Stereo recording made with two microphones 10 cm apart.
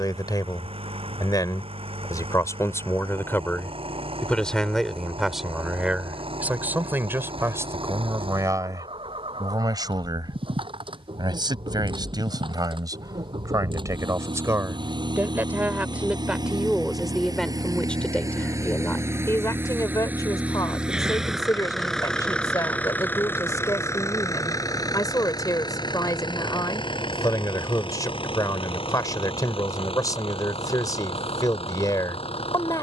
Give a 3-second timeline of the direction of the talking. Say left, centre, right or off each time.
left, centre, right, right, right, centre, left, left, left, left, left.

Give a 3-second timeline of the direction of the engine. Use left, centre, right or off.
right, right, right, right, right, right, right, centre, left, left, left.